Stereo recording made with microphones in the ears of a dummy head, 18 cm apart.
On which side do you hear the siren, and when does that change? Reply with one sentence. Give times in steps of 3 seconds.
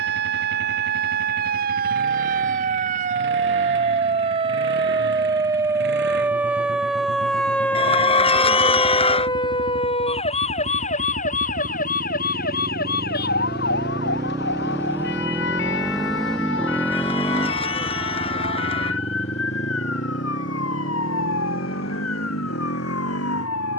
In this clip you hear the siren on the right from 0 s, in the centre from 6 s and on the left from 9 s.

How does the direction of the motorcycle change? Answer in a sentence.
In this clip you hear the motorcycle move from right to left.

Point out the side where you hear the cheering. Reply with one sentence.
In this clip you hear the cheering on the left.